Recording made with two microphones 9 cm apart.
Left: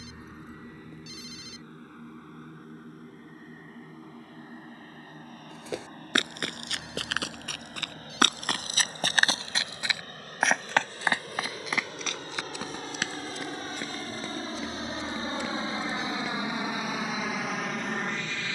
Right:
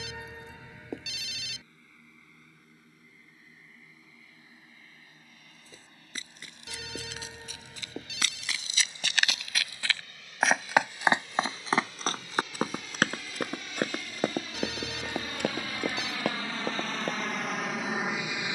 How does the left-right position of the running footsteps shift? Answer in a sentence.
You can hear the running footsteps go from the left side to the right.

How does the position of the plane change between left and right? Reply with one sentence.
You can hear the plane move to the right.